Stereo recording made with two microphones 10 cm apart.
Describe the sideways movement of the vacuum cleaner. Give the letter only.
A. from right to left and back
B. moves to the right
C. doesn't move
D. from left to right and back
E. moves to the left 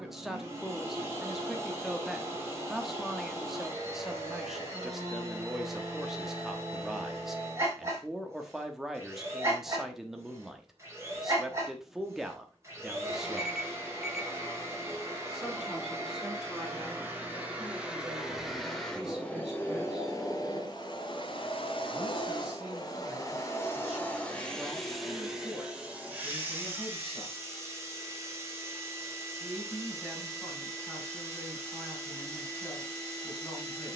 A.